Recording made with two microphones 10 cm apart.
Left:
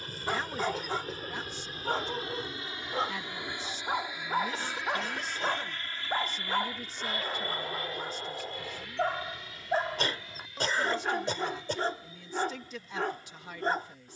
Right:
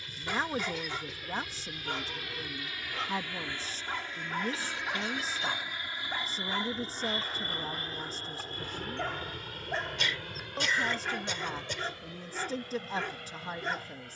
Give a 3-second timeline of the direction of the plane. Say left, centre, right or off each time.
left, centre, right, right, right.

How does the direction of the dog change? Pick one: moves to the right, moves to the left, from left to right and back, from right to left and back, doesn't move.
doesn't move.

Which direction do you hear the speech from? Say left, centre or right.
right.